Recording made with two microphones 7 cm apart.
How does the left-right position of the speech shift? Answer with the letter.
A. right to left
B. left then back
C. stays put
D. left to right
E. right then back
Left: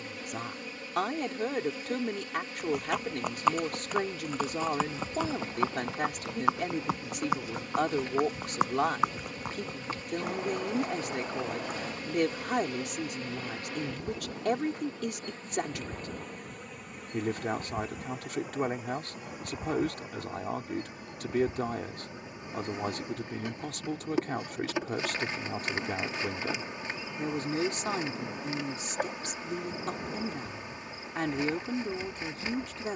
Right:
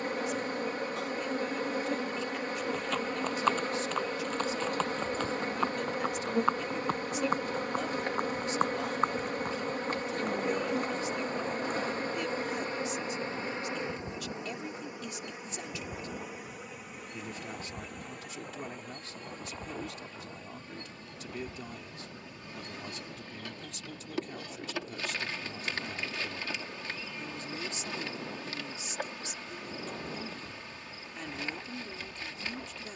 C.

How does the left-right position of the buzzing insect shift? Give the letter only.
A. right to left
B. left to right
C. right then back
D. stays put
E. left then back
A.